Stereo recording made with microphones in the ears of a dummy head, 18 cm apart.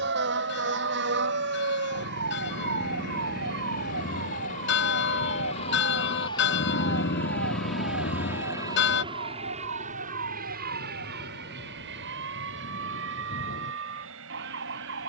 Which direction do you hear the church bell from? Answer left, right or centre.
left.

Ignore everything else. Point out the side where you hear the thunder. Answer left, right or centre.
left.